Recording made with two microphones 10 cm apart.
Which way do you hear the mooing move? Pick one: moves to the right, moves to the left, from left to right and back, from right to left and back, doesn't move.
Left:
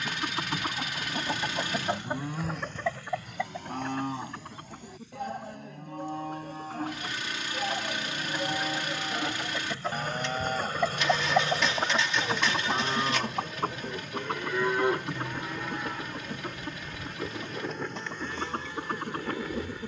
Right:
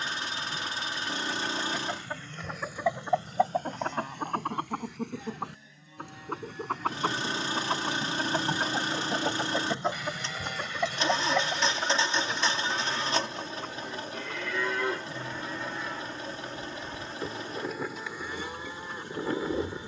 moves to the right.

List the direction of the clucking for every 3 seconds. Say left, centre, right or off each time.
left, right, right, centre, left, left, left.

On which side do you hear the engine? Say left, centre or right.
right.